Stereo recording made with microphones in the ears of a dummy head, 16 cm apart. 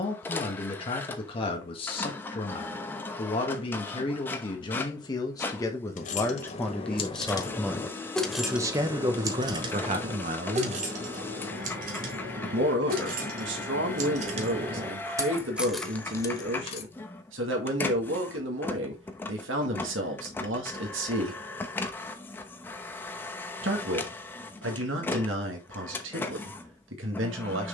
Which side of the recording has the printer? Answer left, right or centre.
centre.